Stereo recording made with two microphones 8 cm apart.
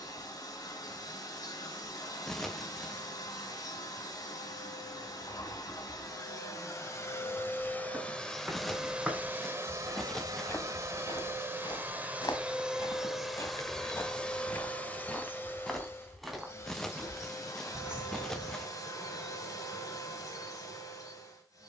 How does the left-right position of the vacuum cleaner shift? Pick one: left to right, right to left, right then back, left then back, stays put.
right then back.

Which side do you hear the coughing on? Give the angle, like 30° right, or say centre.
10° left.